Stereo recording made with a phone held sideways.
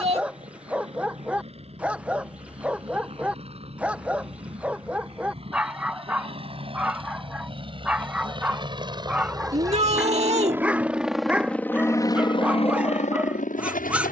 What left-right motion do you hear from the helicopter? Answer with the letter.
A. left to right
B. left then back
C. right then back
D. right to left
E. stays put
D.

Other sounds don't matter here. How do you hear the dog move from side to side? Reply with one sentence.
You can hear the dog stay put.